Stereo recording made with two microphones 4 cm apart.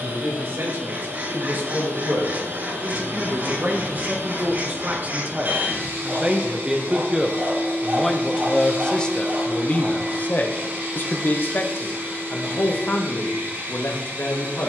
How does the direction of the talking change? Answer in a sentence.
You can hear the talking move to the left.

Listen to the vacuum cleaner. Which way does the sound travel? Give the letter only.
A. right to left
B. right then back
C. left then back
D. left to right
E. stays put
E.